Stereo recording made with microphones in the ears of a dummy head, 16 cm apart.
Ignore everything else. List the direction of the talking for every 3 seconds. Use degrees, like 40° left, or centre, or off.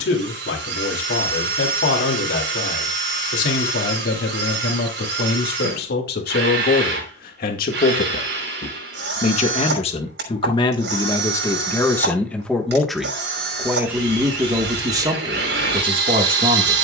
70° left, 60° left, 50° left, 30° left, 10° right, 30° right.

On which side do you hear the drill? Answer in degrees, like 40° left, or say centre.
70° right.